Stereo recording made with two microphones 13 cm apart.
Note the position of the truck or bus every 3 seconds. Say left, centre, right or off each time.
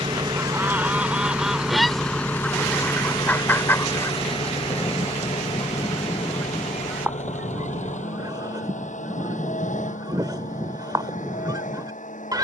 centre, left, left, left.